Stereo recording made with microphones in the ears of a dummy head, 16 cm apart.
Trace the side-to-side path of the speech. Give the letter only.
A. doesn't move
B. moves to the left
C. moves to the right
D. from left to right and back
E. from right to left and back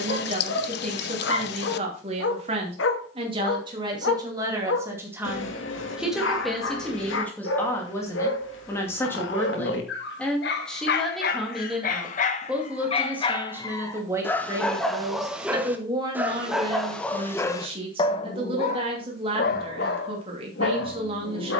E.